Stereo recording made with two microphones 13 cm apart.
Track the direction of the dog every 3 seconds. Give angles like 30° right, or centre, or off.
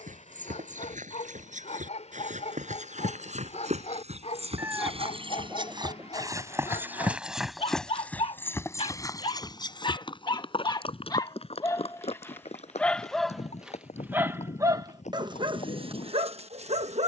60° left, 60° left, 50° left, 30° left, centre, 50° right.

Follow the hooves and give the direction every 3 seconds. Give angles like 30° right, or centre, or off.
70° right, 50° right, centre, 40° left, 60° left, 60° left.